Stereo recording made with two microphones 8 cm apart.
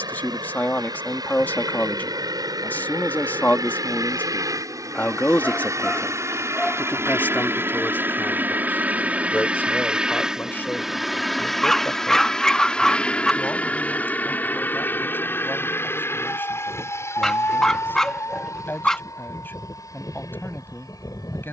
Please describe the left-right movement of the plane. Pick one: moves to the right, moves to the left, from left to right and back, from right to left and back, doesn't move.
moves to the left.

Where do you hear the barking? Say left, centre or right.
centre.